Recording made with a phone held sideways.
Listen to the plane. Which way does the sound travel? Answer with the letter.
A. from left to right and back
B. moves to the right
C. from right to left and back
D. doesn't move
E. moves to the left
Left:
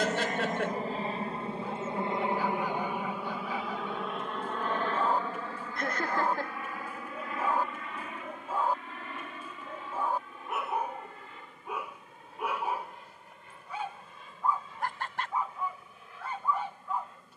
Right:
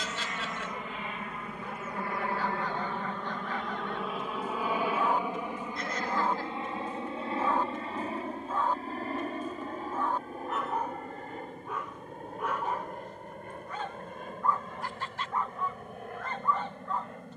B.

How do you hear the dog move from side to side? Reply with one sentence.
In this clip you hear the dog stay put.